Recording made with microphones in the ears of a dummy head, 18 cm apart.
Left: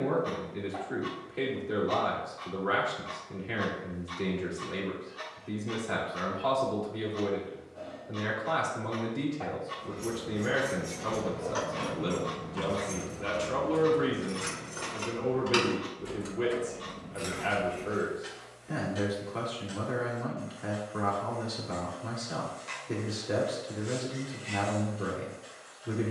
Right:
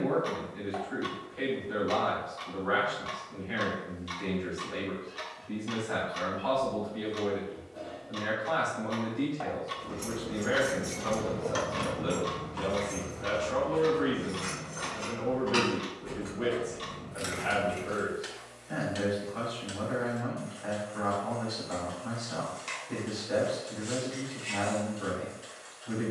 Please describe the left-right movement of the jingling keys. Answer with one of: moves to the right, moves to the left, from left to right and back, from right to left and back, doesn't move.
from right to left and back.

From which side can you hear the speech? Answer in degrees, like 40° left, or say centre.
70° left.